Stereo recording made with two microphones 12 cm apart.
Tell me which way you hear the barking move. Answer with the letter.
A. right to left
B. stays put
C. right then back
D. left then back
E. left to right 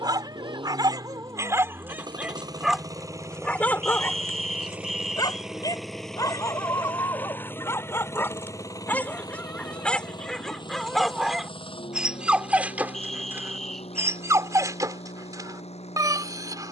D.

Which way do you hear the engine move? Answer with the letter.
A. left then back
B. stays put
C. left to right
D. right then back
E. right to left
E.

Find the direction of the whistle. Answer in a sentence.
In this clip you hear the whistle in the centre.